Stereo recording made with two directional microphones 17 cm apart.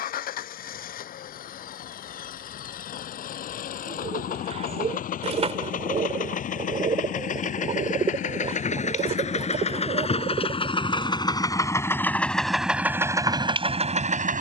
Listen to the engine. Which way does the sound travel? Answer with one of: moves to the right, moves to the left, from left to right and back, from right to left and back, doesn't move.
moves to the right.